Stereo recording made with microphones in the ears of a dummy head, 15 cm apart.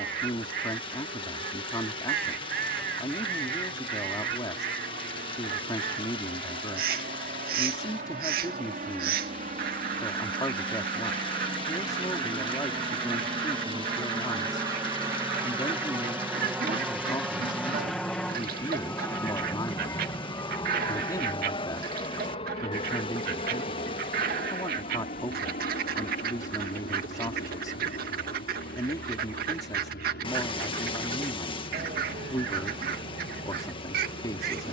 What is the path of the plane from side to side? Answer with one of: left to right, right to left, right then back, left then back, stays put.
right to left.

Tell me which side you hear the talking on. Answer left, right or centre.
left.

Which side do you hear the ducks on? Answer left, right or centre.
right.